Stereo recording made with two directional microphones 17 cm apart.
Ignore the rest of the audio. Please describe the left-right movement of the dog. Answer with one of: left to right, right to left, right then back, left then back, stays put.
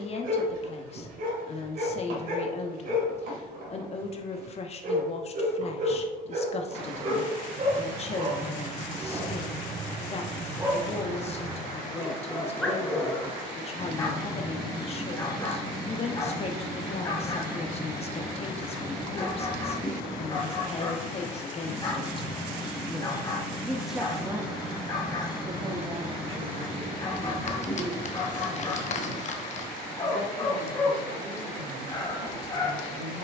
right to left.